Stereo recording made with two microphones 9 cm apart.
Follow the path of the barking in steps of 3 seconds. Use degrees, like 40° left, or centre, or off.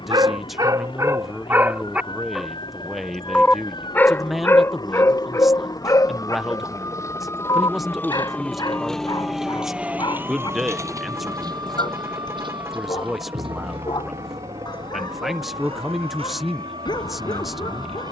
30° right, 30° left, 40° left, 50° left, 50° left, 50° left.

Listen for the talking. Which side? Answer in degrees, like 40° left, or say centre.
centre.